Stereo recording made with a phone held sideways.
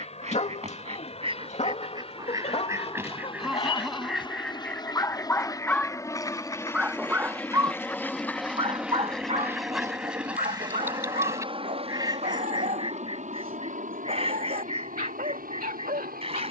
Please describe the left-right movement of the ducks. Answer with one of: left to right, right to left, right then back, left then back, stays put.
left then back.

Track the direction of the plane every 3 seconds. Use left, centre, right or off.
left, left, centre, right, right, right.